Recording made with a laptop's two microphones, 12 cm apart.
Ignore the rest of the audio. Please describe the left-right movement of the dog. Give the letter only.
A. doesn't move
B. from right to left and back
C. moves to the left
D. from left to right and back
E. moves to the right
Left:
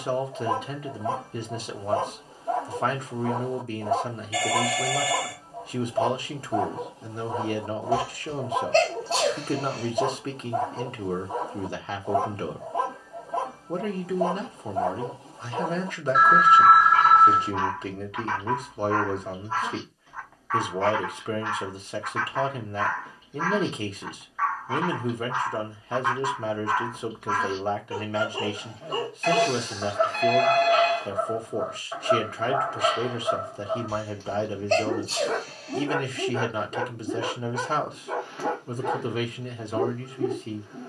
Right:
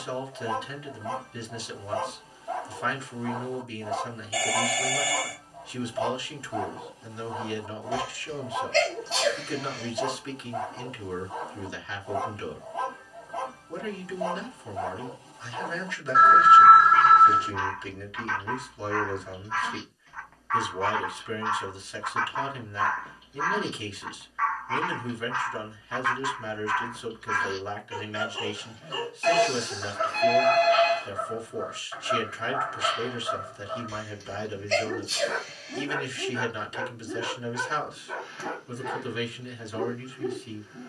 D.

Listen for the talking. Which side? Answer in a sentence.
In this clip you hear the talking on the left.